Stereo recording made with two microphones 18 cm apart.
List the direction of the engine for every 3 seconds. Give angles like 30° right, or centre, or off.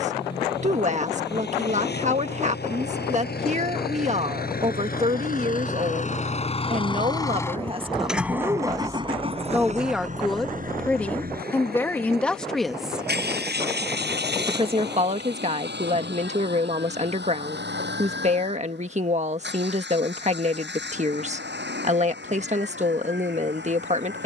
70° left, 60° left, 10° left, 50° right, 70° right, 80° right, 80° right, 80° right.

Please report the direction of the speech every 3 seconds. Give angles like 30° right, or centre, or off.
40° right, 40° right, 30° right, centre, 10° right, 40° right, 40° right, 40° right.